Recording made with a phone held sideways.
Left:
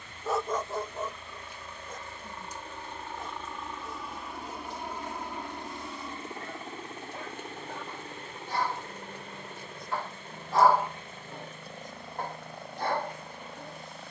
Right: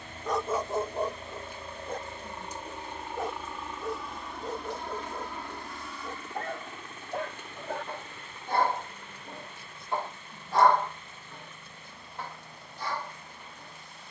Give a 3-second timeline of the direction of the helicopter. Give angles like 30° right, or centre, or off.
30° right, 10° left, 30° left, 50° left, 50° left.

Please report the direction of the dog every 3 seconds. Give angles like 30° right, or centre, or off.
30° right, 80° right, 60° right, centre, 50° left.